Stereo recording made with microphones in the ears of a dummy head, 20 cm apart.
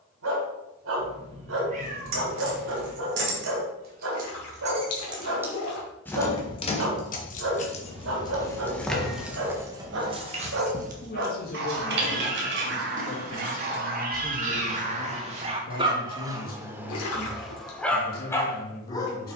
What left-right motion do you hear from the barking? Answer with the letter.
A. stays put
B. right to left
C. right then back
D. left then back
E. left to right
B.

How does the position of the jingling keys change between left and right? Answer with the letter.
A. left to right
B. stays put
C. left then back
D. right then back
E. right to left
C.